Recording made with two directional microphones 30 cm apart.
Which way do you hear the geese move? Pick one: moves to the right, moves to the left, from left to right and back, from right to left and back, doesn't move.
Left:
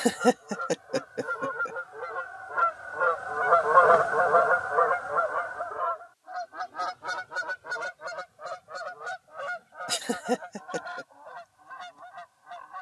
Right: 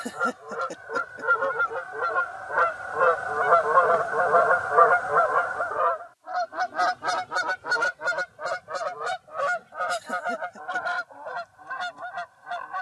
from right to left and back.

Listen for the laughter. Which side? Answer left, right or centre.
left.